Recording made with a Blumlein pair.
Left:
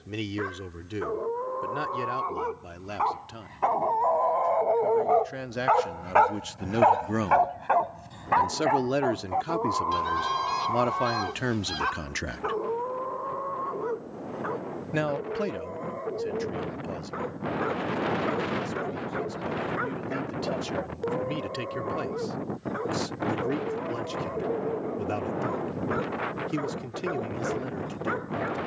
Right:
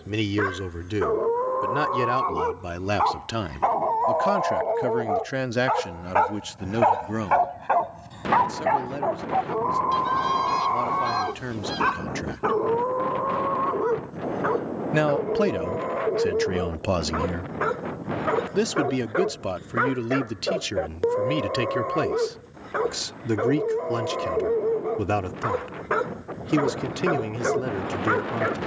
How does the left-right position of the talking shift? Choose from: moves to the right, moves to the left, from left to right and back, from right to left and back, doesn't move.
from right to left and back.